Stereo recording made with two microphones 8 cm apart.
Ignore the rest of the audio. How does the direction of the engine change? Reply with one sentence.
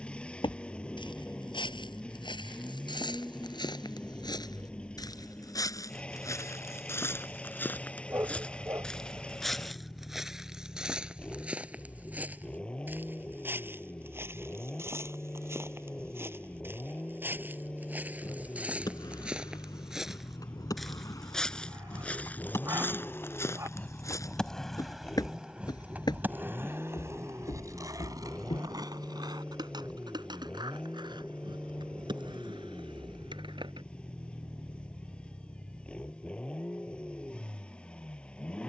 You can hear the engine stay put.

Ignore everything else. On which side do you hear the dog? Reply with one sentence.
You can hear the dog on the right.